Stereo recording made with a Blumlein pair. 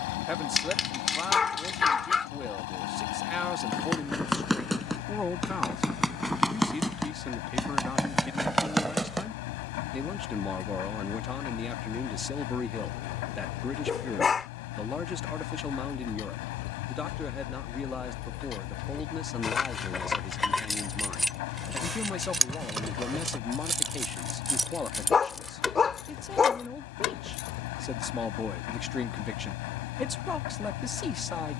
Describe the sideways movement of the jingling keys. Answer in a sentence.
You can hear the jingling keys move from left to right and back again.